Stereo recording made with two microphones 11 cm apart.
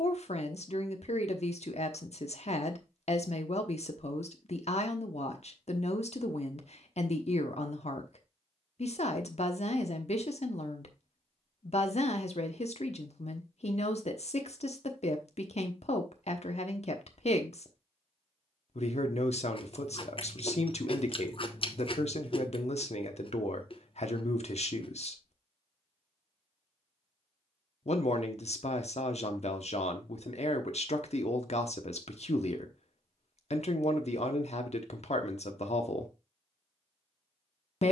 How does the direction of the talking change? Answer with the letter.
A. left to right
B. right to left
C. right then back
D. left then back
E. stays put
E.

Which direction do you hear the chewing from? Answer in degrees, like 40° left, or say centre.
50° left.